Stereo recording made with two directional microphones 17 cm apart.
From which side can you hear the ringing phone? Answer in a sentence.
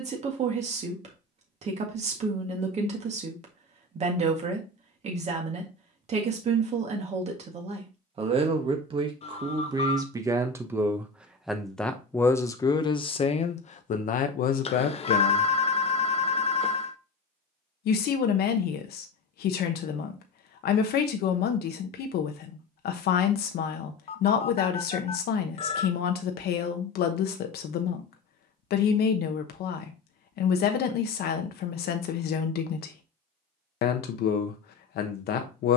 You can hear the ringing phone on the left.